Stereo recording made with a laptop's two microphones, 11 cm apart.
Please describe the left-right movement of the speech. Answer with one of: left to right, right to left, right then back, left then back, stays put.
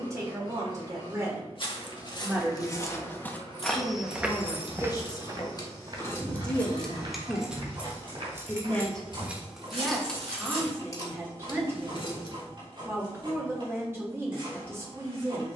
left then back.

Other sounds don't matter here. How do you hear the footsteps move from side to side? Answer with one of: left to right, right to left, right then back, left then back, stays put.
left to right.